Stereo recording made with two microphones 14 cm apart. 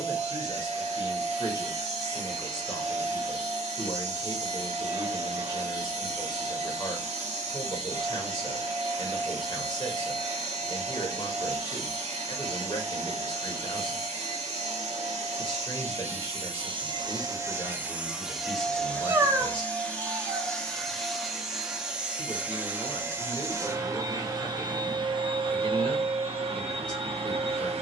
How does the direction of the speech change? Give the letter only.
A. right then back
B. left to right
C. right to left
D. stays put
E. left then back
D.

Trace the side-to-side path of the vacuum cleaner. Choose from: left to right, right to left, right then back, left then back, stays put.
left then back.